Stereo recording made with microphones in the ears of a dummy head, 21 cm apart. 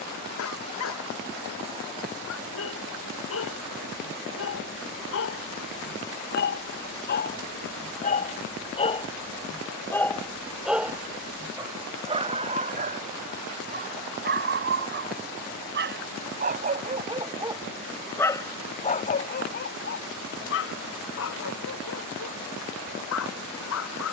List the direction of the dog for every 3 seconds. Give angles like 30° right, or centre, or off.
70° left, 60° left, 40° left, centre, 40° right, 30° right, 40° left, 70° left.